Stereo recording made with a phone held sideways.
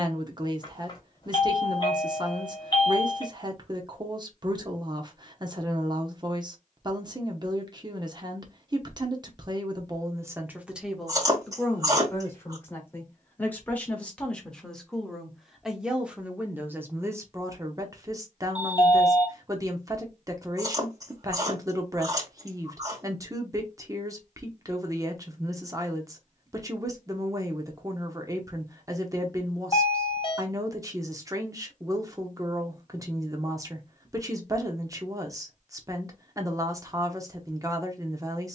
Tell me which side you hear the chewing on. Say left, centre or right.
right.